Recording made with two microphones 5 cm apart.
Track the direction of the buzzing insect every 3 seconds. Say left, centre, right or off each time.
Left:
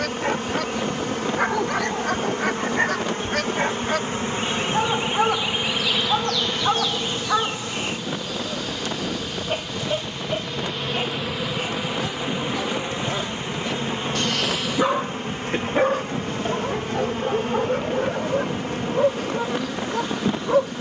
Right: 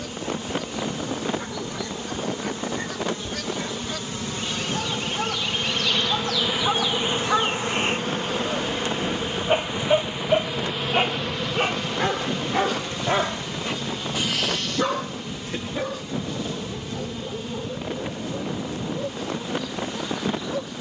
left, left, right, centre, left, left, left.